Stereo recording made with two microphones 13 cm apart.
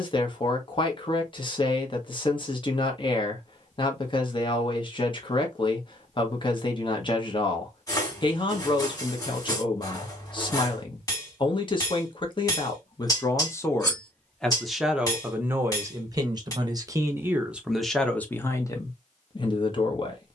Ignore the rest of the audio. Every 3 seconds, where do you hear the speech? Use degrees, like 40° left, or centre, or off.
40° left, 40° left, 40° left, 40° left, 20° left, 20° right, 30° left.